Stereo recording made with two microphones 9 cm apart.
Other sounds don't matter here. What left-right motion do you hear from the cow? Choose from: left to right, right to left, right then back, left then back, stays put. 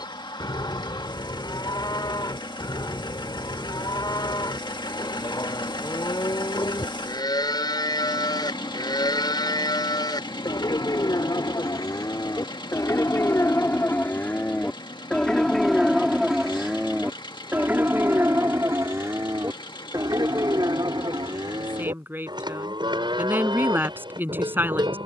left to right.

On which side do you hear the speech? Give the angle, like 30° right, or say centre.
20° right.